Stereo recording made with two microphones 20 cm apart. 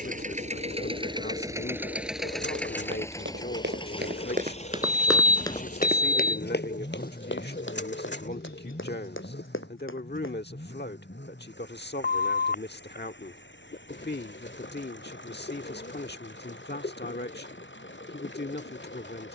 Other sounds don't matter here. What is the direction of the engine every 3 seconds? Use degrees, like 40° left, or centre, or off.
20° right, 30° left, 50° left, 60° left, 60° left, 60° left, 70° left.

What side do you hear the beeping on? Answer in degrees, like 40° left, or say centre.
50° left.